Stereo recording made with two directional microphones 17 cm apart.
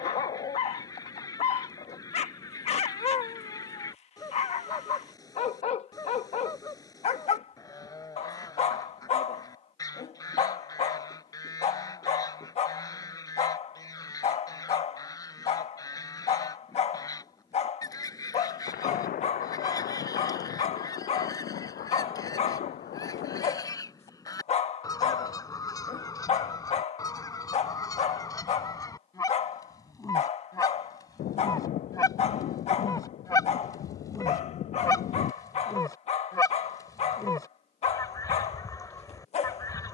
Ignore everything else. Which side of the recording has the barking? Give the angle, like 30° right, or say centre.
40° left.